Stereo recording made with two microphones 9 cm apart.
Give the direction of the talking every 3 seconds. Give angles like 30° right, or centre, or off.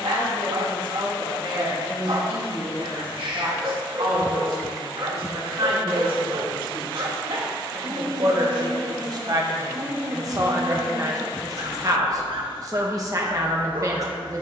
80° right, 70° right, 60° right, 40° right, 40° right.